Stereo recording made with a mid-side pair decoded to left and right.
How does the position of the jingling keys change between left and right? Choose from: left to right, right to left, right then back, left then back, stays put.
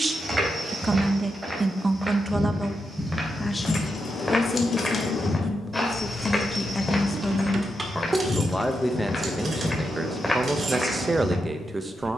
left to right.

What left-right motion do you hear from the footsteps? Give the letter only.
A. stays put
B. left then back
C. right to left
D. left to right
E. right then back
B.